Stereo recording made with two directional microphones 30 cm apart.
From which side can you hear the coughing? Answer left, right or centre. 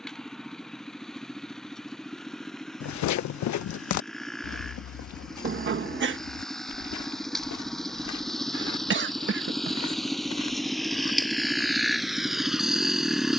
right.